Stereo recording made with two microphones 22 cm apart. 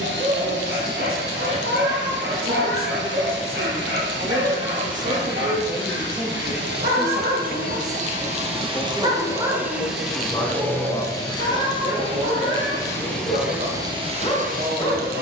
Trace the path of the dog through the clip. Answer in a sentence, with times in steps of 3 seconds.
In this clip you hear the dog on the right from 0 s, in the centre from 9 s and on the left from 12 s.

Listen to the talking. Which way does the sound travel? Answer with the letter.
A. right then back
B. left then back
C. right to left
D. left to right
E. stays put
B.